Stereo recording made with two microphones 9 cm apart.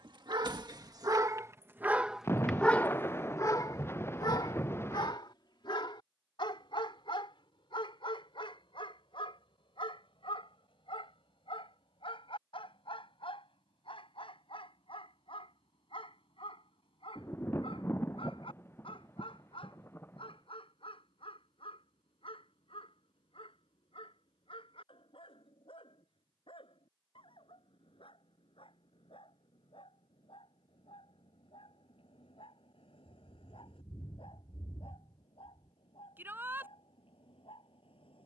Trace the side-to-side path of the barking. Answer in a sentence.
You can hear the barking move to the left.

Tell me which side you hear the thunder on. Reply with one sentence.
In this clip you hear the thunder on the left.